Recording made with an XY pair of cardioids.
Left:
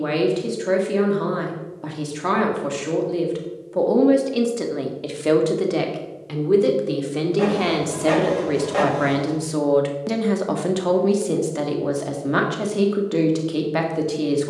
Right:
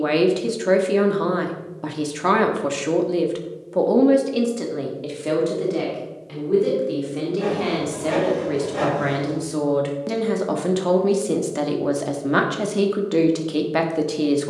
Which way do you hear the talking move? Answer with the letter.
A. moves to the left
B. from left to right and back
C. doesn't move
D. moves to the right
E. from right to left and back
E.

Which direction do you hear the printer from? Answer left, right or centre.
left.